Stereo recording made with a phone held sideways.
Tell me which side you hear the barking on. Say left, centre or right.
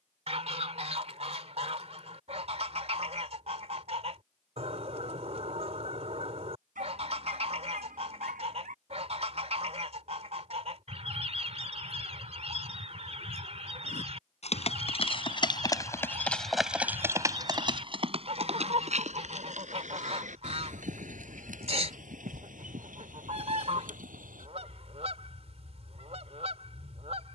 right.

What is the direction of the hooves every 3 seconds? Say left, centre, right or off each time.
off, off, off, off, left, centre, right, right, right.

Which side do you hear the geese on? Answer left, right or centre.
right.